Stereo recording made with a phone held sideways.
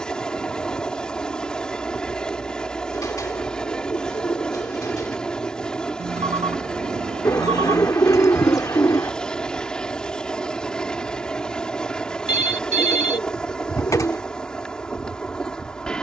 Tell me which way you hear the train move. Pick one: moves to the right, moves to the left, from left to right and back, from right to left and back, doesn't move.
doesn't move.